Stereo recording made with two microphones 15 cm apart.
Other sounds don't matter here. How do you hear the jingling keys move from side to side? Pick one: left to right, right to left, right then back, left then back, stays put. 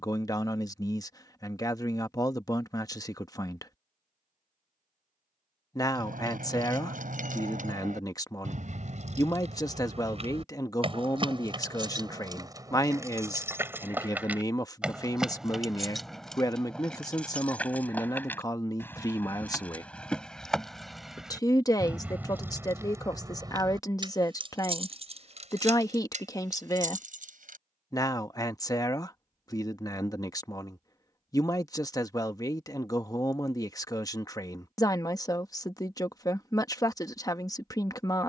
left then back.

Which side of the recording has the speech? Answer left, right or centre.
left.